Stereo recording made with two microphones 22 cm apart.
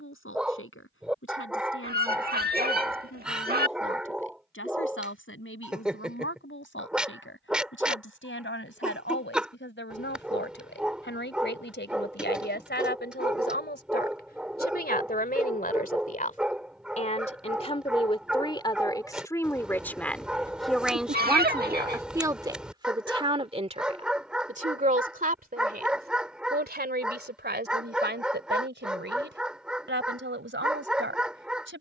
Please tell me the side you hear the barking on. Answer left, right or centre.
centre.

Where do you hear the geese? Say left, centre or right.
right.